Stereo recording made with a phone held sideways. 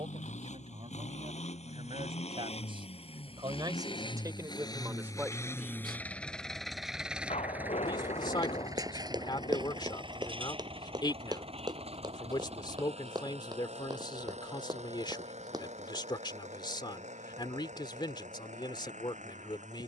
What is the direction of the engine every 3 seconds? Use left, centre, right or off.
left, left, centre, right, right, right, right.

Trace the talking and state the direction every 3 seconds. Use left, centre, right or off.
right, right, left, left, left, left, left.